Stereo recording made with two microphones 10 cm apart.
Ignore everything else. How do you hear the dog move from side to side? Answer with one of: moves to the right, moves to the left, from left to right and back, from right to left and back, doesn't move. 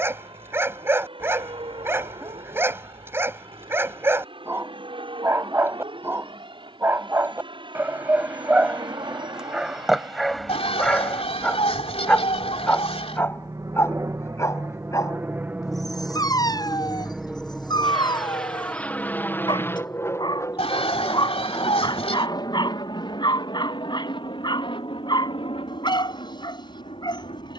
moves to the left.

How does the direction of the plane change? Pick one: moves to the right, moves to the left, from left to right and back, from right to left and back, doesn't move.
moves to the left.